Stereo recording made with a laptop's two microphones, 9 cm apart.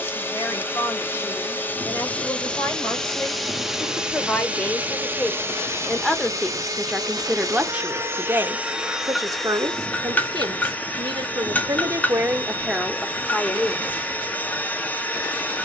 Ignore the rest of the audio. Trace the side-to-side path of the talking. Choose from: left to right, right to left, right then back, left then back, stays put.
right then back.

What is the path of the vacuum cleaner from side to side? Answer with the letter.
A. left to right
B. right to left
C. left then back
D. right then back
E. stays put
D.